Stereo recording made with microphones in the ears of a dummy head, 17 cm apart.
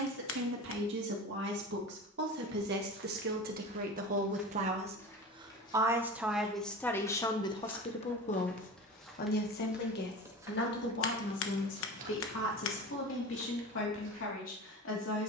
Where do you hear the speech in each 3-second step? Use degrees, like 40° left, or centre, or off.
60° right, 40° right, 20° left, 60° left, 70° left.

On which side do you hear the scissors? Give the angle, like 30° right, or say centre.
70° left.